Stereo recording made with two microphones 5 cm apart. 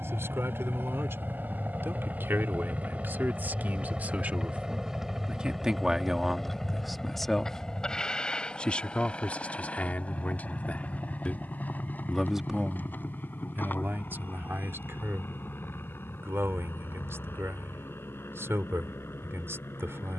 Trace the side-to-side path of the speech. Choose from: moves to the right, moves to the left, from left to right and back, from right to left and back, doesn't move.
from right to left and back.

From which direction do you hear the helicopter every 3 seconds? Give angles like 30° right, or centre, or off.
40° right, 10° right, 10° left, 30° left, 40° left, 50° left, 50° left.